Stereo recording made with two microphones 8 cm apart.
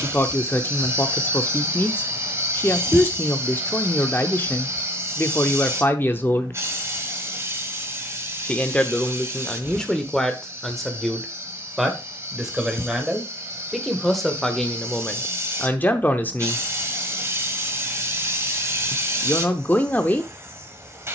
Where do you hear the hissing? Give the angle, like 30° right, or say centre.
30° right.